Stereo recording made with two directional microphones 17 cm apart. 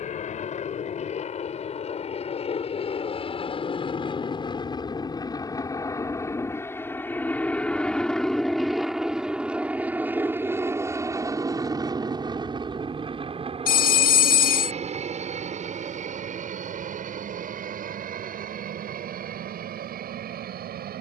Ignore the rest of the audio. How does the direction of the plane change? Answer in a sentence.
In this clip you hear the plane go from the left side to the right.